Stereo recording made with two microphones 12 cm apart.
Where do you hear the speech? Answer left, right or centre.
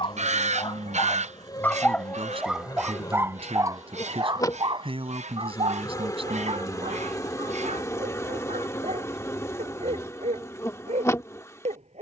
right.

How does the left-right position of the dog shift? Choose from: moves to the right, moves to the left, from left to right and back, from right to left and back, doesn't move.
moves to the right.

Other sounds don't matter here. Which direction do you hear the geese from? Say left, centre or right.
right.